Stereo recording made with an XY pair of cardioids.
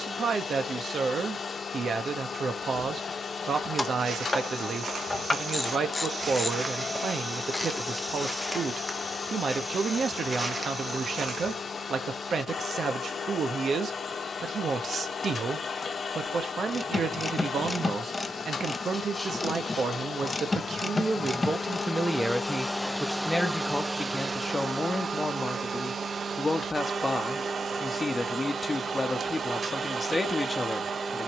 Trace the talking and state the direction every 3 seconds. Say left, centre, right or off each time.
right, right, right, right, right, right, right, centre, left, left, left.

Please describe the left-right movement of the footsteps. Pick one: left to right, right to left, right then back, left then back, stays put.
left then back.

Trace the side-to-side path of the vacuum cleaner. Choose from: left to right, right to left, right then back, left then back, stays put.
left to right.